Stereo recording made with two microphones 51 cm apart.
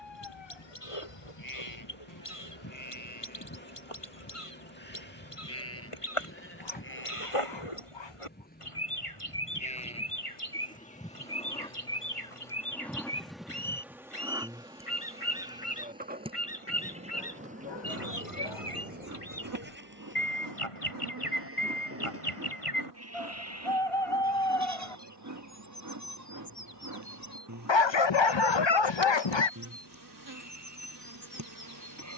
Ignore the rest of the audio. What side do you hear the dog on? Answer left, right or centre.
left.